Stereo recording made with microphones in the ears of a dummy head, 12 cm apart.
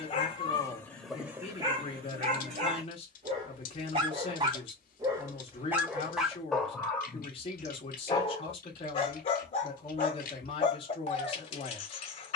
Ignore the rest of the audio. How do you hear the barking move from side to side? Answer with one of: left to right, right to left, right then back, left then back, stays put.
right then back.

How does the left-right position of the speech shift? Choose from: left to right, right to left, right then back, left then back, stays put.
stays put.